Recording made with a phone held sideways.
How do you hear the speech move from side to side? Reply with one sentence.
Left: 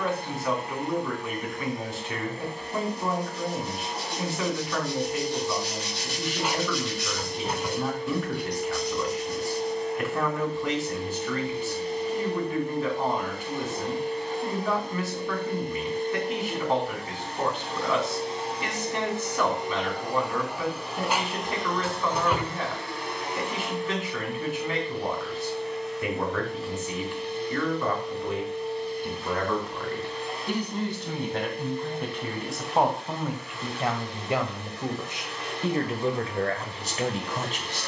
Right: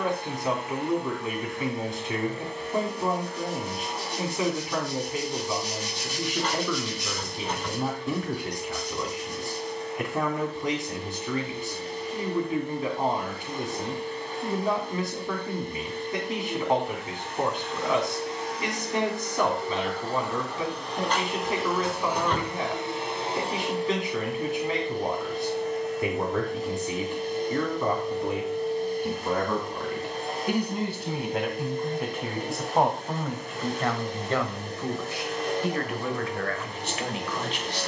You can hear the speech go from the right side to the left.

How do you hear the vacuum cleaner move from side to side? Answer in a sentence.
In this clip you hear the vacuum cleaner move to the right.